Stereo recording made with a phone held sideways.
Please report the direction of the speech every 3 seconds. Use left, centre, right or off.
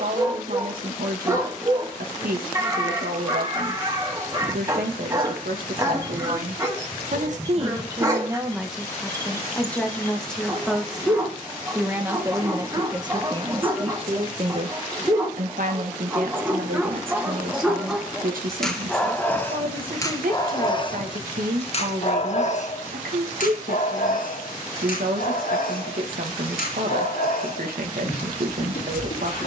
right, right, right, centre, right, right, right, right, right, right.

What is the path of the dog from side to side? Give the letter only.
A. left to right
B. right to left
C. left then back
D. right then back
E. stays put
B.